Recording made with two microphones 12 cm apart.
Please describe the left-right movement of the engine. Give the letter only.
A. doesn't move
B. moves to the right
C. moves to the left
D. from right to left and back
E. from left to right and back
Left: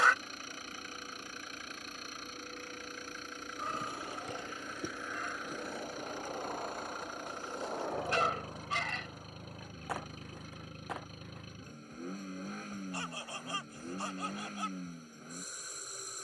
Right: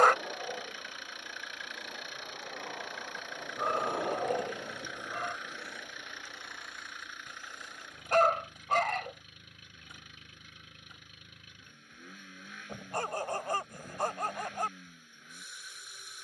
A.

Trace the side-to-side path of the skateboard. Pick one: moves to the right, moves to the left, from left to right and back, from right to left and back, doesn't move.
moves to the left.